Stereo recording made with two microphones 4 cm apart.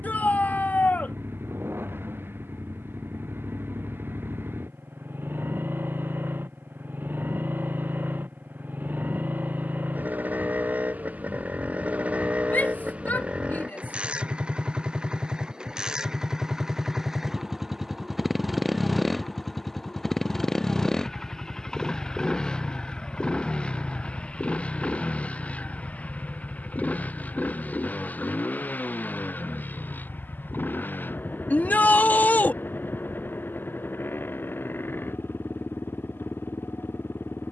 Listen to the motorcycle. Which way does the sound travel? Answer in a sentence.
You can hear the motorcycle go from the right side to the left.